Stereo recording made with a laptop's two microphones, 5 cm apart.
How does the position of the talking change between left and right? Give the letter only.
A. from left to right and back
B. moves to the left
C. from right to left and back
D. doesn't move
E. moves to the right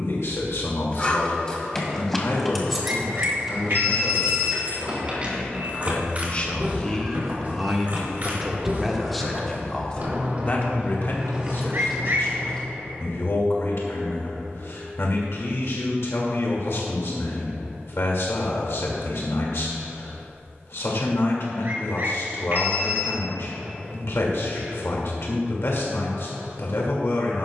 A.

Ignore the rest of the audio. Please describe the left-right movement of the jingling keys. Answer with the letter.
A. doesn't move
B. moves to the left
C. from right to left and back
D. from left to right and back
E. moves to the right
D.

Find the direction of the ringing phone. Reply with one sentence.
You can hear the ringing phone on the right.